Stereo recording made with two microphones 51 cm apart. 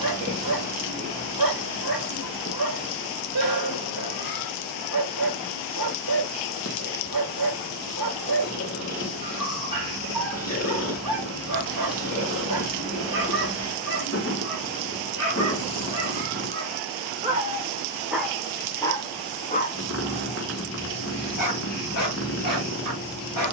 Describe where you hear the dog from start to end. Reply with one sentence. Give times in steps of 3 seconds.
In this clip you hear the dog on the right from 0 s, in the centre from 18 s and on the left from 21 s.